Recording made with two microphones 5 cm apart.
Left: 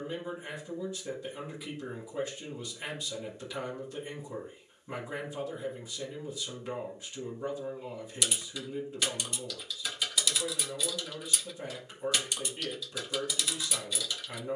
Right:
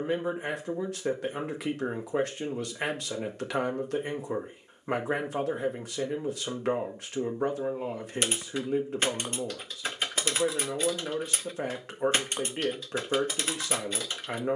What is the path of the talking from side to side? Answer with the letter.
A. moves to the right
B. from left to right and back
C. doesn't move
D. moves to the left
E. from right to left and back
C.